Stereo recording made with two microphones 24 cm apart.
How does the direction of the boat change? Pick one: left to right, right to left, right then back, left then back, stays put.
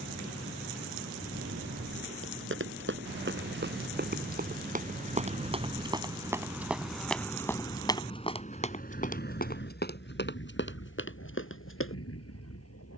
right to left.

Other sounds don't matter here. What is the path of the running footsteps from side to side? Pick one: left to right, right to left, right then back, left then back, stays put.
right to left.